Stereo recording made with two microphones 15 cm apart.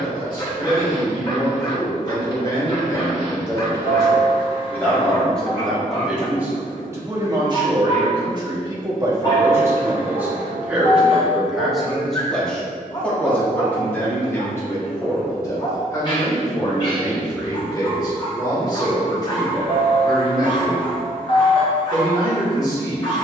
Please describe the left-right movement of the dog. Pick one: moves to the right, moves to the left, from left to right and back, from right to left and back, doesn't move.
doesn't move.